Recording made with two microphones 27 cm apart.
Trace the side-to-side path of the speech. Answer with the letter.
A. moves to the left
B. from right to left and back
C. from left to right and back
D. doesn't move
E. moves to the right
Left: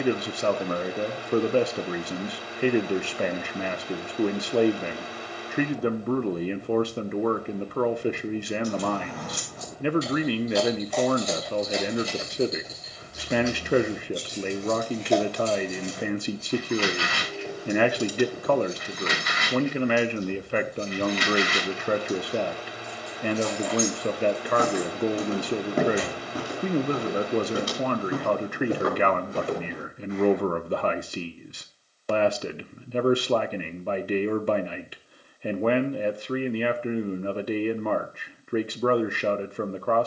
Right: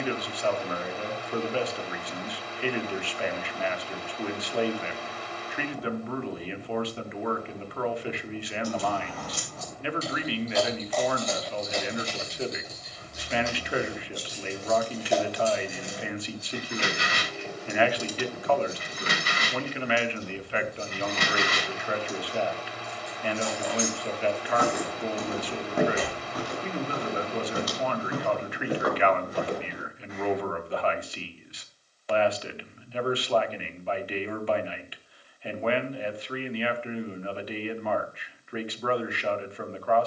D.